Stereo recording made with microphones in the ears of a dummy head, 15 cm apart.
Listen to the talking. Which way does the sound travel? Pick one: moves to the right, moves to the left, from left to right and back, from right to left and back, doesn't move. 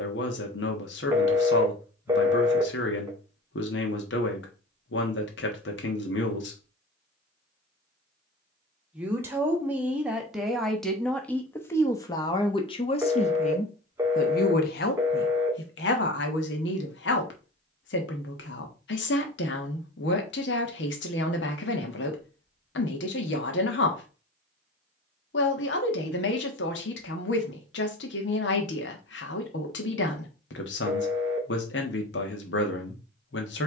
from left to right and back.